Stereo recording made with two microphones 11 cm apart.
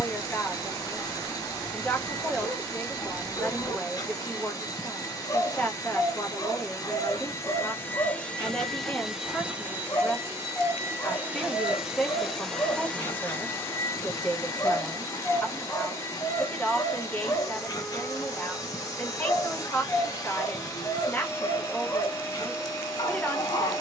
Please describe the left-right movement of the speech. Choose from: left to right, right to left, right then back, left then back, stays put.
stays put.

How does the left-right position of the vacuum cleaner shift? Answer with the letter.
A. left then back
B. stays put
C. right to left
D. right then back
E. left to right
D.